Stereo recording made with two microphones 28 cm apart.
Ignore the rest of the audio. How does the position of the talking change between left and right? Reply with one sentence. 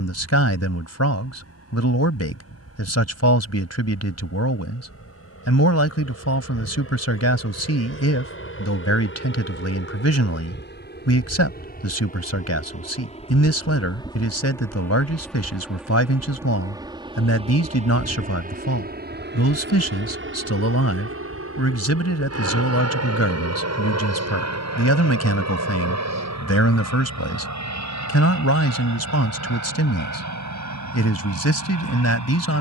In this clip you hear the talking stay in one place.